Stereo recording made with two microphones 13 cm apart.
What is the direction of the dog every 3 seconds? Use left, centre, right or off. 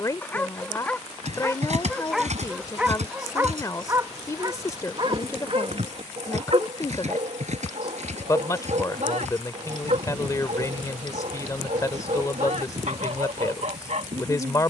centre, right, right, right, right.